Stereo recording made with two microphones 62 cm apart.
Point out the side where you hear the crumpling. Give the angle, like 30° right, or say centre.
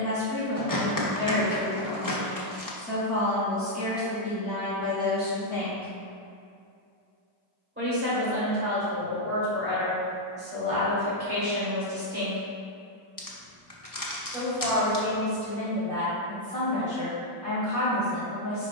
30° left.